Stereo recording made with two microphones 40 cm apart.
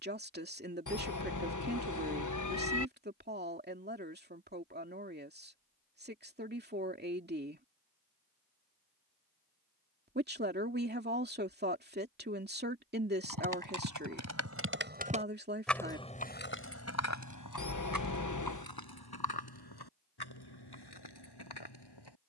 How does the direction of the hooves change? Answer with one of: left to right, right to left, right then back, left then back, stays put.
right to left.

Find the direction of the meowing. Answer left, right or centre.
left.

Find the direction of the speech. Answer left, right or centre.
right.